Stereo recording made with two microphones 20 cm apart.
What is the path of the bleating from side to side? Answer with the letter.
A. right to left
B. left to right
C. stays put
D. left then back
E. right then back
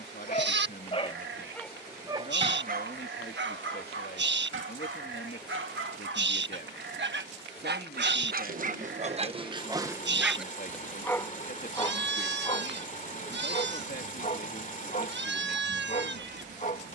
C.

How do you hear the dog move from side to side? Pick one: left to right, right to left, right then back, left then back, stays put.
right then back.